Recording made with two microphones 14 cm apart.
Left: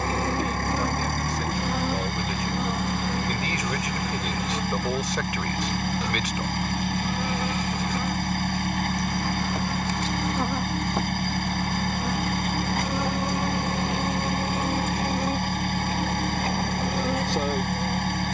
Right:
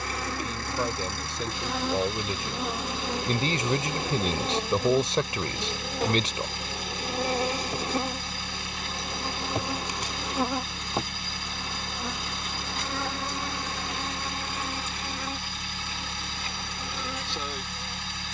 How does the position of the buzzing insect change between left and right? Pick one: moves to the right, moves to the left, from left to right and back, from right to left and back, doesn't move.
from left to right and back.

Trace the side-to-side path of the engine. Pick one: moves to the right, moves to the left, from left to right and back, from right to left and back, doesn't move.
doesn't move.